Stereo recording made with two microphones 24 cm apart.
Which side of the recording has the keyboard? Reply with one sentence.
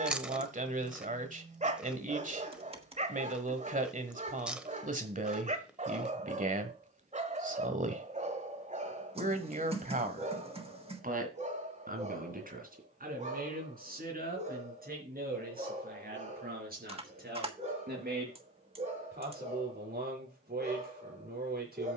You can hear the keyboard on the right.